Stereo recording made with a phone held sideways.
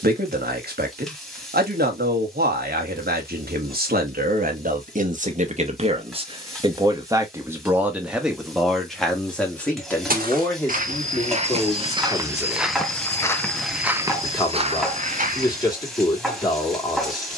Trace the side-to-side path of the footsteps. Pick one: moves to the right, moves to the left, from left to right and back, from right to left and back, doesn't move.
from right to left and back.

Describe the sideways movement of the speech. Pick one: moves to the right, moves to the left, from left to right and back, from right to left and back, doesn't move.
moves to the left.